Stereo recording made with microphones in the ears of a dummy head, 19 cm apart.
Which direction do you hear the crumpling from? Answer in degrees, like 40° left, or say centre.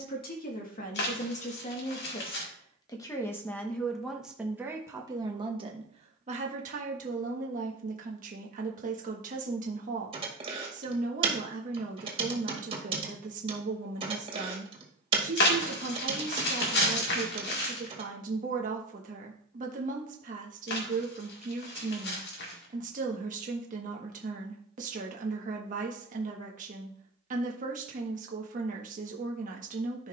50° left.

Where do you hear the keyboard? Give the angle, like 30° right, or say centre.
20° right.